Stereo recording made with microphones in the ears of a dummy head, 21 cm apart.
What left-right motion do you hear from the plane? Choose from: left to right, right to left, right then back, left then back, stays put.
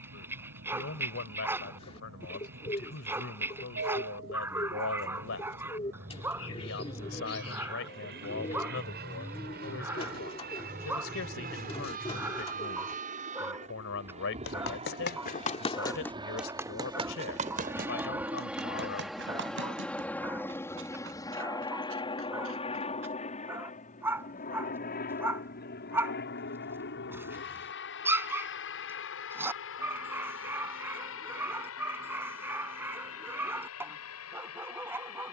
right to left.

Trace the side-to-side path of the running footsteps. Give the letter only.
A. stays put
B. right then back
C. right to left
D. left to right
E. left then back
D.